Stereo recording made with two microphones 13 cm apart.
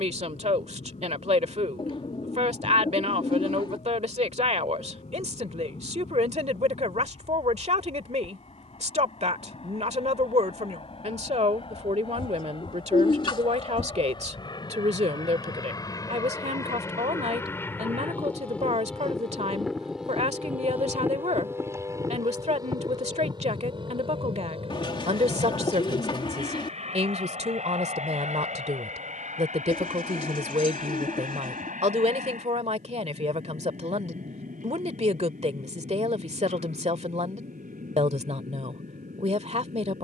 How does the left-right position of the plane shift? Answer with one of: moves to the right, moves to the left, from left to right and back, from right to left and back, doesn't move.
moves to the right.